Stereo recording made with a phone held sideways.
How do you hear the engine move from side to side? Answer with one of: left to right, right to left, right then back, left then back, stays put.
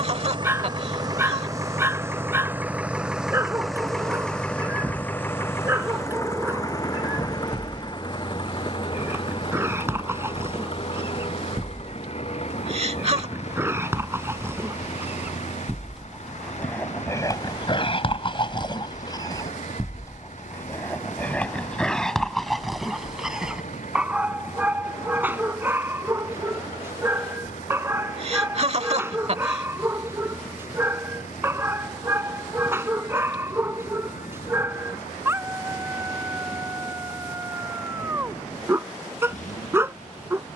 right to left.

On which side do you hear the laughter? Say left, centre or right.
right.